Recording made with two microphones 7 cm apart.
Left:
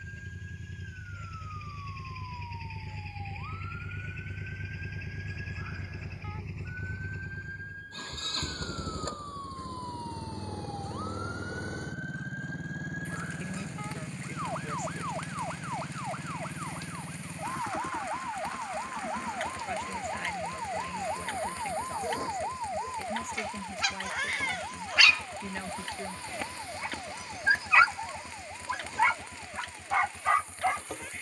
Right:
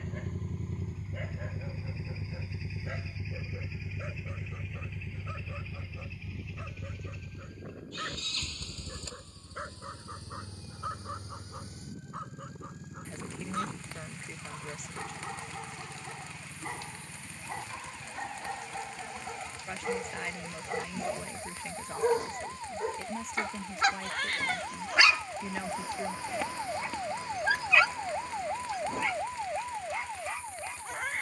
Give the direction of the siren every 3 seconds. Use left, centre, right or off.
left, left, left, left, left, left, left, left, centre, right, right.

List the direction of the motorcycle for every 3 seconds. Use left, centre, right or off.
right, centre, left, left, left, left, left, left, left, left, left.